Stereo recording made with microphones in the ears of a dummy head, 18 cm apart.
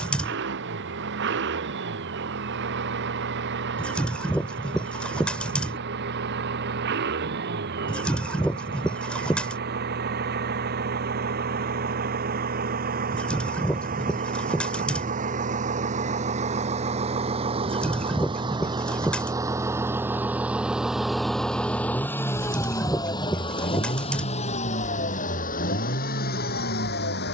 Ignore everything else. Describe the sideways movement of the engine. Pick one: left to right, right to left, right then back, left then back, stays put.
right to left.